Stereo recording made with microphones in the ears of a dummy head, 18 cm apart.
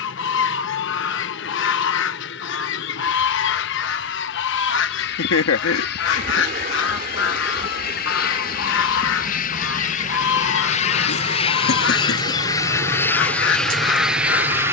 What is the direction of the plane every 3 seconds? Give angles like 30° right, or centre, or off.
60° left, 60° left, 50° left, 40° left, 10° left.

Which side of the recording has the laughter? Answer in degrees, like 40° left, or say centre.
70° left.